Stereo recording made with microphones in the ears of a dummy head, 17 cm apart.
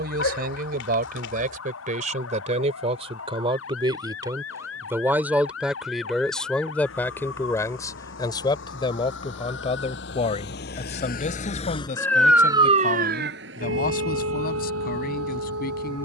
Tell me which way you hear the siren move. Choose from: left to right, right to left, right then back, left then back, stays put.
left to right.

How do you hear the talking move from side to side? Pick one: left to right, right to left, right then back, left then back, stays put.
right to left.